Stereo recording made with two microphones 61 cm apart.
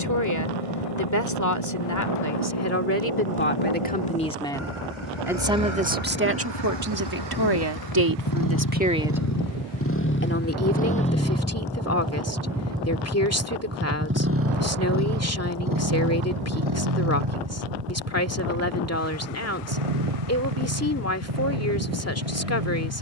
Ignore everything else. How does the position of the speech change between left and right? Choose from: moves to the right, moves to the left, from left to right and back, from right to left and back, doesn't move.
from left to right and back.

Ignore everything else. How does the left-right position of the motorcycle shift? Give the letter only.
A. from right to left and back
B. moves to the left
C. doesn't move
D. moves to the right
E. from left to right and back
D.